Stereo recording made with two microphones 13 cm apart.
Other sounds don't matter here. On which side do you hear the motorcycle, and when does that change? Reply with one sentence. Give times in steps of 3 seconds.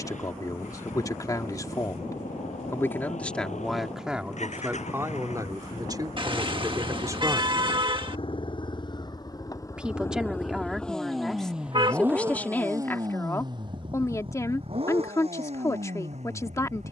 In this clip you hear the motorcycle on the left from 0 s, in the centre from 9 s and on the right from 12 s.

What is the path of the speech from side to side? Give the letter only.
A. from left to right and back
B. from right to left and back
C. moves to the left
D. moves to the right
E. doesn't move
A.